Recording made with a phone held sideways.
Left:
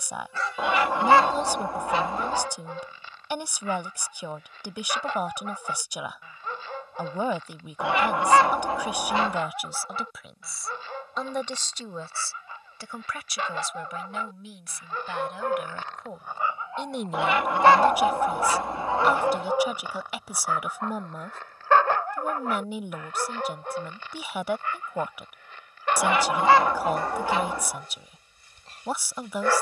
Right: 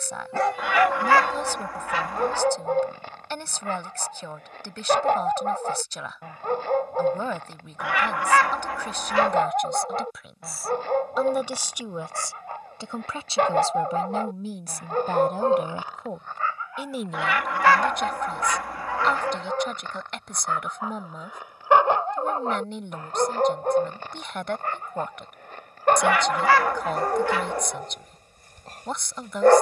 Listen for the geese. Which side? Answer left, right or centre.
left.